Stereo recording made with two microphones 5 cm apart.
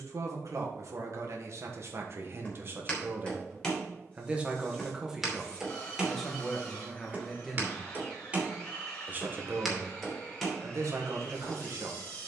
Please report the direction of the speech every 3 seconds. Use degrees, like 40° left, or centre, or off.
60° right, 20° right, centre, 60° right.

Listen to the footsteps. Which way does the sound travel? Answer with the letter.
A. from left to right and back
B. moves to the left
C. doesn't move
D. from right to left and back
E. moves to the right
A.